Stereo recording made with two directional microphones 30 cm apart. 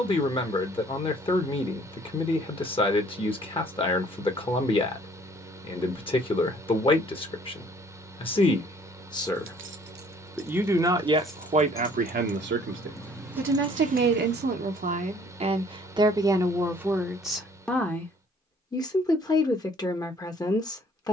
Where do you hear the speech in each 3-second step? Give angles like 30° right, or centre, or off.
20° left, 20° left, 20° left, 10° right, 30° right, 10° right, 10° left.